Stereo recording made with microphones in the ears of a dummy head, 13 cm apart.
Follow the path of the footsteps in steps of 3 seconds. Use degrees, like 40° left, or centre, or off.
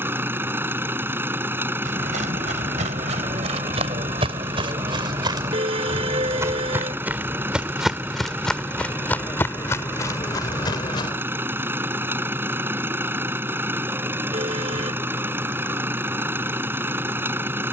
50° right, 40° right, 10° right, 20° left, off, off.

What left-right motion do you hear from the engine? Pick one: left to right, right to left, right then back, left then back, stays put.
stays put.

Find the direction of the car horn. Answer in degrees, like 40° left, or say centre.
40° right.